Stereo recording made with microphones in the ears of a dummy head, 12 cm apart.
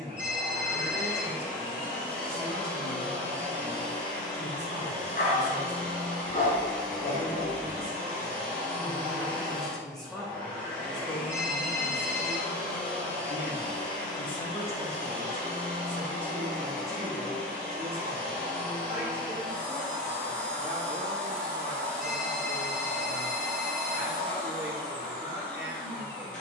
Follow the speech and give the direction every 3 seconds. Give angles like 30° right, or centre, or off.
30° right, 30° right, 20° right, 10° left, 40° left, 20° right, 20° right, 20° right, 20° right.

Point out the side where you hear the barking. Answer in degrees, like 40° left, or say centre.
70° left.